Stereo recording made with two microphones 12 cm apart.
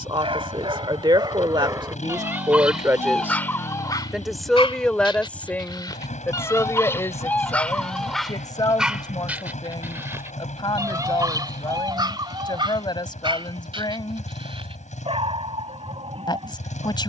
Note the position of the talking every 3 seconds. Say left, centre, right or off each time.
right, centre, left, left, left, left.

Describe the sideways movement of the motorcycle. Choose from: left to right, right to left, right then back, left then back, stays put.
stays put.